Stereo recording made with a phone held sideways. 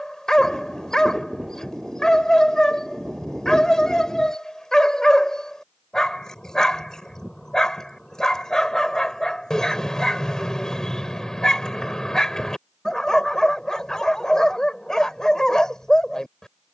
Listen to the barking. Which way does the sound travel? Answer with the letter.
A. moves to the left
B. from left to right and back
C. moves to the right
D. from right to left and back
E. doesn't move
E.